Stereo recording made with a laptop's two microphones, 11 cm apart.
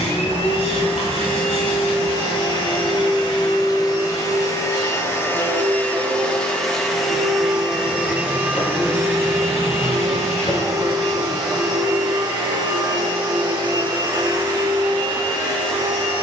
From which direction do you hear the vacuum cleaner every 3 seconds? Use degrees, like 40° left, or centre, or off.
50° left, 30° left, 10° right, 30° right, 40° right, 50° right.